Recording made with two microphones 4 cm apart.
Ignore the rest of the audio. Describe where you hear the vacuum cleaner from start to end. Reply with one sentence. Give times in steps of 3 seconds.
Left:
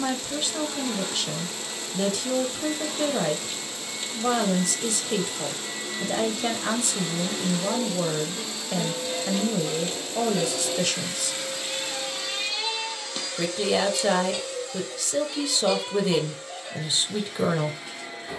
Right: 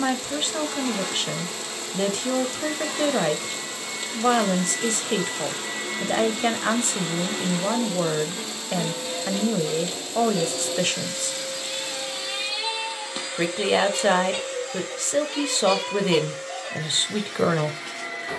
You can hear the vacuum cleaner on the right from 0 s, in the centre from 9 s and on the right from 12 s.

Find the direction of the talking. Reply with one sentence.
In this clip you hear the talking on the right.